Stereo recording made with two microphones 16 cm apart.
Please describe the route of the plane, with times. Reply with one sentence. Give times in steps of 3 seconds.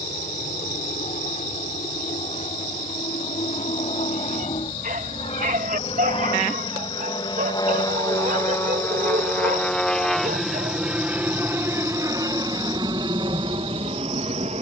You can hear the plane on the left from 0 s, in the centre from 9 s and on the right from 12 s.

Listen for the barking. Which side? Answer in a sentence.
You can hear the barking on the right.